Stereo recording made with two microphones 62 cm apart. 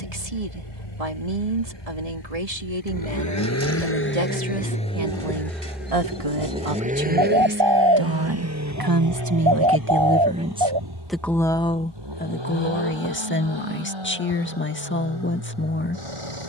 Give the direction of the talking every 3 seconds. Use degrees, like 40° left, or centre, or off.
70° right, 70° right, 50° right, 10° right, 20° left, 20° left.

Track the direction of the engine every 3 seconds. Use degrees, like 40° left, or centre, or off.
40° left, 10° left, 20° right, 30° right, 50° right, 50° right.